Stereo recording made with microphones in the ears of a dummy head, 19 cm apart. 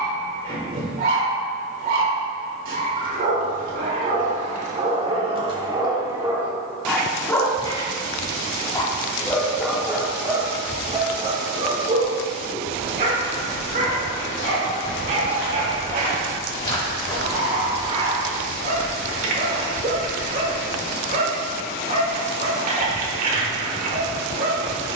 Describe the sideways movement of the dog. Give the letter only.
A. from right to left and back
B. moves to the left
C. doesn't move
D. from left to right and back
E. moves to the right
A.